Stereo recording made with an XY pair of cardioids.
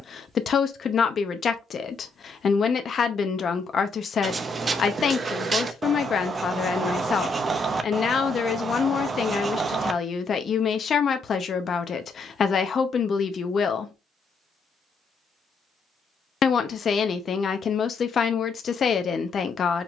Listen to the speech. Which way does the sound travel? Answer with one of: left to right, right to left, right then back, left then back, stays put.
stays put.